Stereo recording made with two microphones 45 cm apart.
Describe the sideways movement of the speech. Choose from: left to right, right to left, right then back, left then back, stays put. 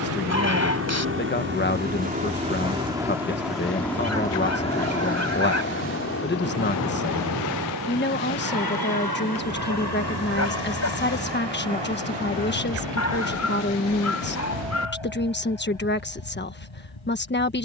stays put.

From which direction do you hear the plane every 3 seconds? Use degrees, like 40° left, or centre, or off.
20° right, 10° left, 40° left, 50° left, 60° left, 70° left.